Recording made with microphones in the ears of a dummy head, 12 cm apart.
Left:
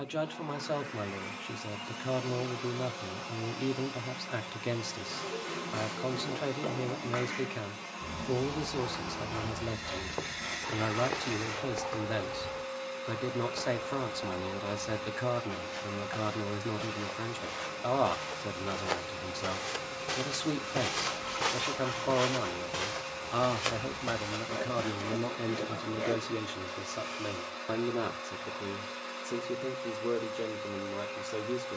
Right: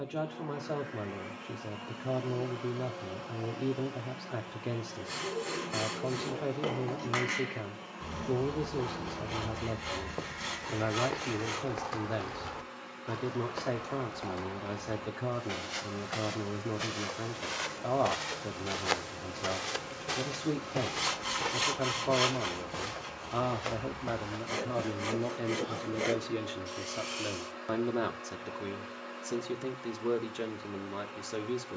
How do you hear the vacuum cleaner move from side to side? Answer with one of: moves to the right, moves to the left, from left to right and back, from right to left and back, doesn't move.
doesn't move.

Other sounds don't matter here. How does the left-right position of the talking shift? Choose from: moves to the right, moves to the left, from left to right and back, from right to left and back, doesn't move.
moves to the right.